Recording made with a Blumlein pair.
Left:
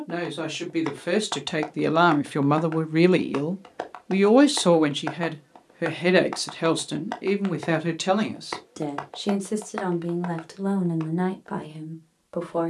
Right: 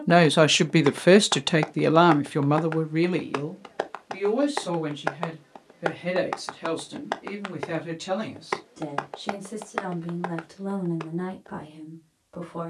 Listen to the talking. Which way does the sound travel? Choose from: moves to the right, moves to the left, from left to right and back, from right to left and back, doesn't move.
moves to the left.